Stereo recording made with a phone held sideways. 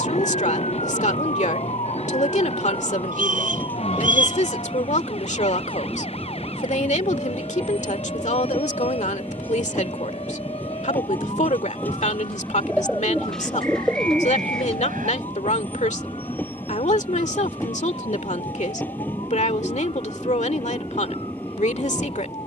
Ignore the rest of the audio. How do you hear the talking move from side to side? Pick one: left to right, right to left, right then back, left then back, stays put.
stays put.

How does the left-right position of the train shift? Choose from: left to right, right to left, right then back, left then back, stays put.
stays put.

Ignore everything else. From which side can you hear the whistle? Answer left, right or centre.
right.